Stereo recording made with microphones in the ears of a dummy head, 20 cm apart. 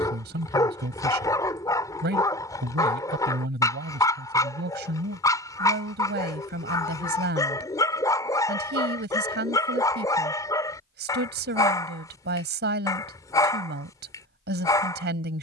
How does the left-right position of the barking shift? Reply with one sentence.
You can hear the barking stay put.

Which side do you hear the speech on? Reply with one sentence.
You can hear the speech on the right.